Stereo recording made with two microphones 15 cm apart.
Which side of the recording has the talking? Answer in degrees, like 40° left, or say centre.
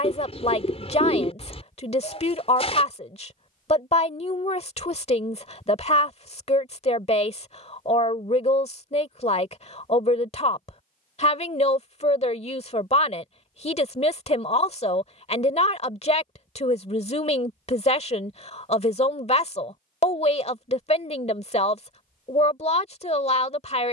40° left.